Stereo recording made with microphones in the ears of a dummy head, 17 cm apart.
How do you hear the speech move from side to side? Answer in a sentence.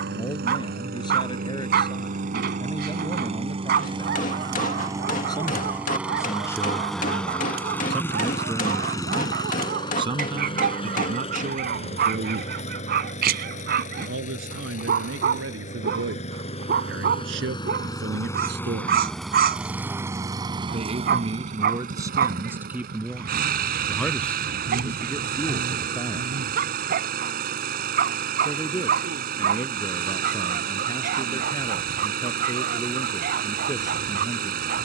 In this clip you hear the speech move from left to right and back again.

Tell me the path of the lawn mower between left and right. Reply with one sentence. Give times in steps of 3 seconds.
You can hear the lawn mower on the right from 0 s, in the centre from 6 s, on the left from 9 s, in the centre from 18 s and on the right from 21 s.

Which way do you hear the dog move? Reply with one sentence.
You can hear the dog stay put.